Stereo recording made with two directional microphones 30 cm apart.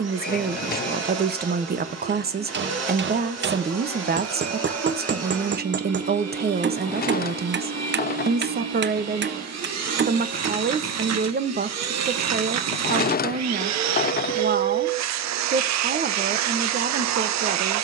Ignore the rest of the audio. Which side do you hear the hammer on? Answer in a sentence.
In this clip you hear the hammer on the right.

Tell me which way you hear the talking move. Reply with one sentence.
In this clip you hear the talking stay put.